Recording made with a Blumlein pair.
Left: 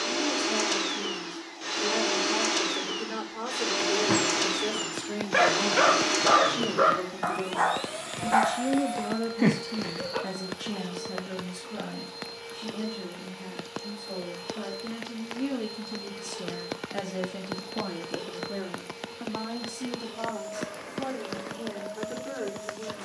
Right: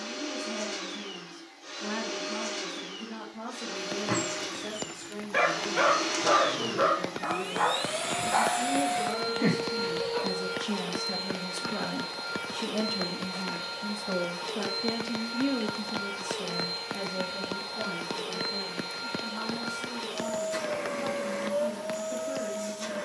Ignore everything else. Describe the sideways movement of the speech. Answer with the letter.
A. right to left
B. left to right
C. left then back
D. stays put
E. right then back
E.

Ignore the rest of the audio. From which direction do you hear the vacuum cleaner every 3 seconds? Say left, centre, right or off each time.
left, left, centre, right, right, right, right, right.